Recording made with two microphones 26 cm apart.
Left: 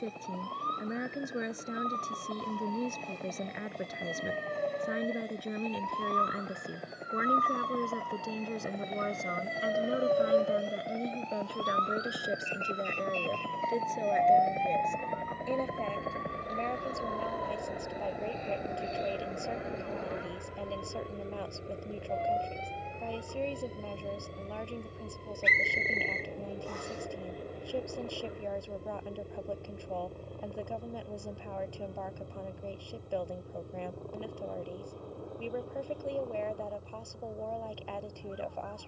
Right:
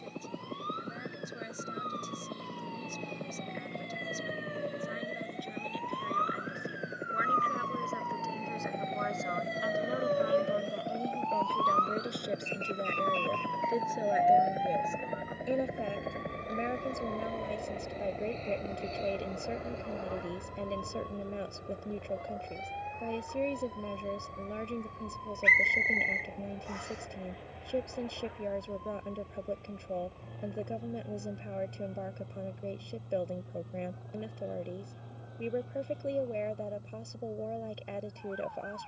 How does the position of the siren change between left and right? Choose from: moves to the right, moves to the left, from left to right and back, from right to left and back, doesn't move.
moves to the right.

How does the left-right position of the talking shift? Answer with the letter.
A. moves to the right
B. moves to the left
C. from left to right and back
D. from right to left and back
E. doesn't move
A.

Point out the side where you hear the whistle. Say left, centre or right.
left.